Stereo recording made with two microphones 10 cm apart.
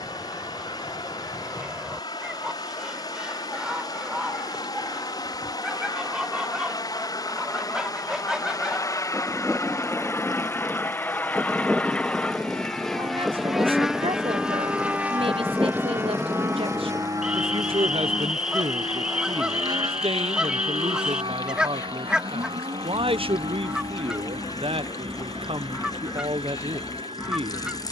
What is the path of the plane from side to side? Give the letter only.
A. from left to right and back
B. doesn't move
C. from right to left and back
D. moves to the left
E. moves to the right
E.